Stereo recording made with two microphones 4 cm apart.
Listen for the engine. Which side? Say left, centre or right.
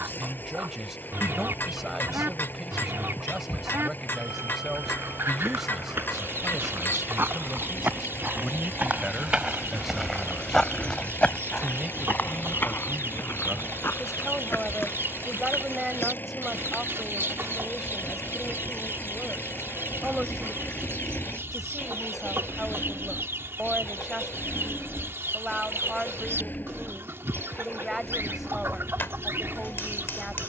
left.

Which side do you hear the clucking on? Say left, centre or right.
right.